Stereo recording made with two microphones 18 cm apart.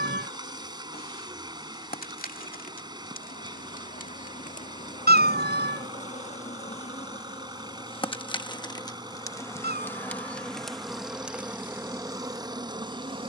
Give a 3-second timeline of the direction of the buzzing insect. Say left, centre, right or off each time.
left, left, left, centre, right.